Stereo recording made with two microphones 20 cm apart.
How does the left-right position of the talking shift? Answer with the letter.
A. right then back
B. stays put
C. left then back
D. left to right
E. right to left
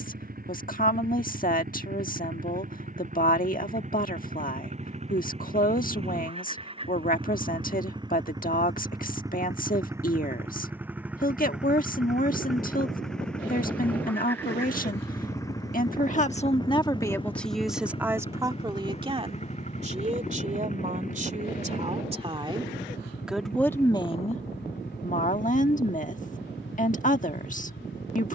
A.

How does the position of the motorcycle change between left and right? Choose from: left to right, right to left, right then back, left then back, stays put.
right to left.